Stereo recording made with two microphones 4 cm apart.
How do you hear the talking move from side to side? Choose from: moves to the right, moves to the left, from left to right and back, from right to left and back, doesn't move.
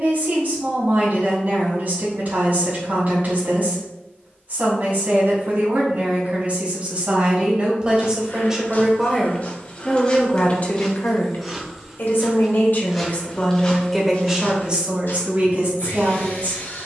from right to left and back.